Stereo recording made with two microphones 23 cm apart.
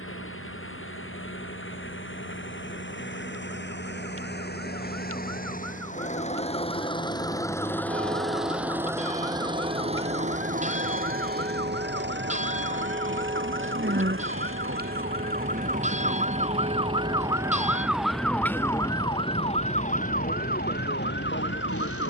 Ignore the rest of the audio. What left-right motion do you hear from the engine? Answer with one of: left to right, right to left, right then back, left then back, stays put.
left to right.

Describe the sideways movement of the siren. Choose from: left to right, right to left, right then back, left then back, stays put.
right to left.